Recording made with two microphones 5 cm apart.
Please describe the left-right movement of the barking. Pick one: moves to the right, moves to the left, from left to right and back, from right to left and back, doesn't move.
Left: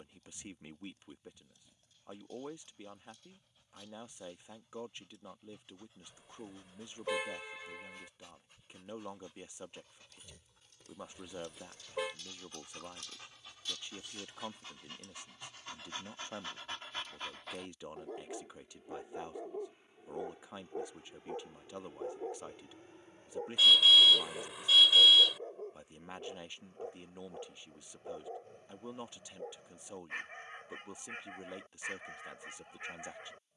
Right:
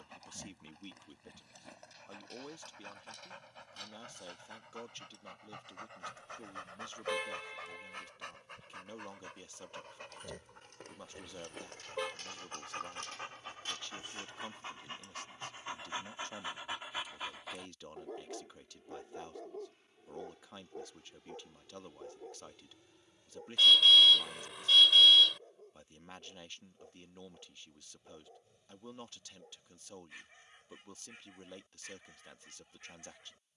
moves to the left.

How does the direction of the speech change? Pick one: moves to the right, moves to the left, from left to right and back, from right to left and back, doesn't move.
doesn't move.